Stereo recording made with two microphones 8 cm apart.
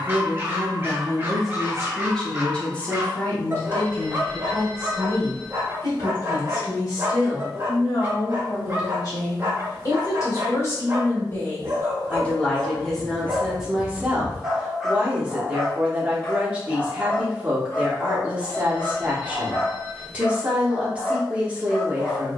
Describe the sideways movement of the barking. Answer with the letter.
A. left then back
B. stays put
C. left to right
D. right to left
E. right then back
D.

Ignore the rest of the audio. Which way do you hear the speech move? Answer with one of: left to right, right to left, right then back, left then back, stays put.
left then back.